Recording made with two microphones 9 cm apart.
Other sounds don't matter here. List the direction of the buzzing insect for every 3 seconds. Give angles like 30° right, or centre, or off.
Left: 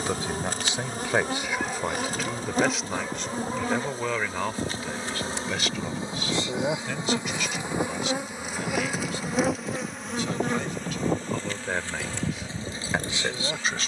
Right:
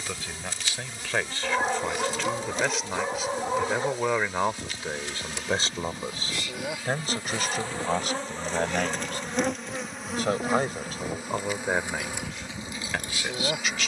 50° left, 40° left, 20° left, centre, 10° right.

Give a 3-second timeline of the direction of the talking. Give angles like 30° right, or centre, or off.
10° left, 20° right, 50° right, 40° right, 20° left.